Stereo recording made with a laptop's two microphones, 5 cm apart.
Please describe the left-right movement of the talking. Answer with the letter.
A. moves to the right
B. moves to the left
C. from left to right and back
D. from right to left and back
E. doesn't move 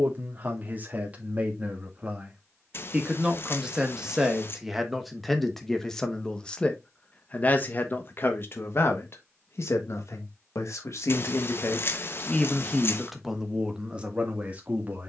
D.